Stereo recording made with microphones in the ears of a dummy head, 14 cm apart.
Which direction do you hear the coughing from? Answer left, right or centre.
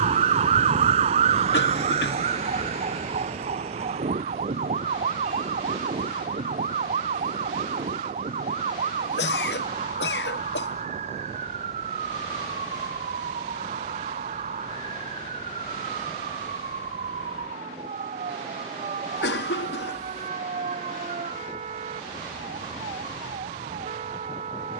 left.